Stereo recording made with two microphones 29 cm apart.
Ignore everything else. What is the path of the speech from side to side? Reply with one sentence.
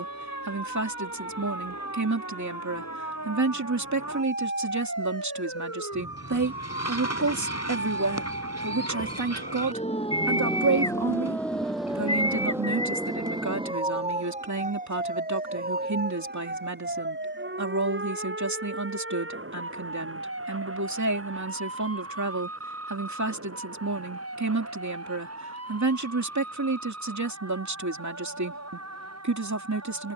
In this clip you hear the speech stay in one place.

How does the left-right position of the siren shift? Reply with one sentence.
In this clip you hear the siren travel towards the right.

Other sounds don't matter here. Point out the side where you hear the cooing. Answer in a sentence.
You can hear the cooing on the left.